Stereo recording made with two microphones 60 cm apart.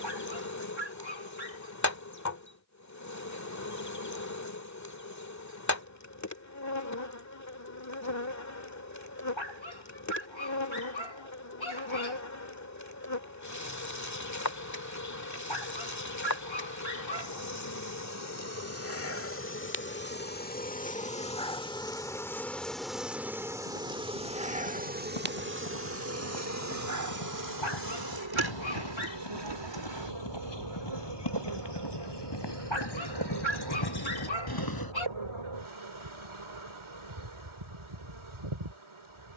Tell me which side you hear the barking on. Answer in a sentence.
You can hear the barking on the left.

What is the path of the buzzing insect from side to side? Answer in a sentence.
In this clip you hear the buzzing insect travel towards the right.